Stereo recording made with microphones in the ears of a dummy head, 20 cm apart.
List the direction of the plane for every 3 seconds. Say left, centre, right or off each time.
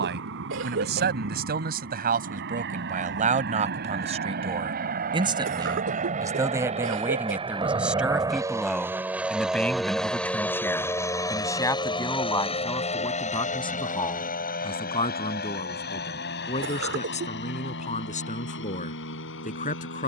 right, right, right, centre, left, left, left.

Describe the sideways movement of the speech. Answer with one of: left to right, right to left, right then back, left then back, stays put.
right to left.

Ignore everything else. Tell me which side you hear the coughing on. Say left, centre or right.
right.